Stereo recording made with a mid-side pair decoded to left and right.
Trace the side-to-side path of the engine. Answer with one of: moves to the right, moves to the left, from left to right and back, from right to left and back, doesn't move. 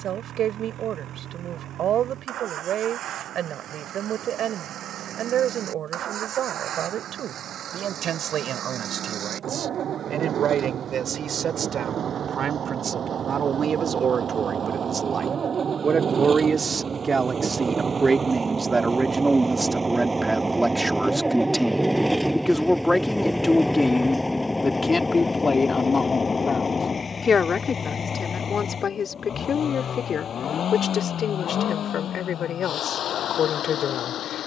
moves to the left.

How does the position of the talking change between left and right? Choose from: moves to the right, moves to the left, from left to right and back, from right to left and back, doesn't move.
moves to the left.